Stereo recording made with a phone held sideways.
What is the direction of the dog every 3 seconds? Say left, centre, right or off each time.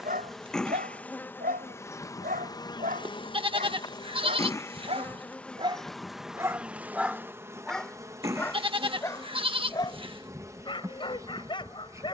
right, right, centre, left.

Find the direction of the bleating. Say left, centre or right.
right.